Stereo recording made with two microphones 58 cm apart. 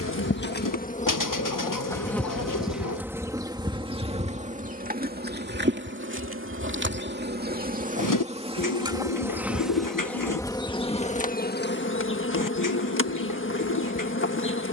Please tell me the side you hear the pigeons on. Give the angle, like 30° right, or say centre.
30° left.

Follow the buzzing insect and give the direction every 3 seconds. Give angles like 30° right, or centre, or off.
10° left, 10° right, 20° right, 10° left, 20° left.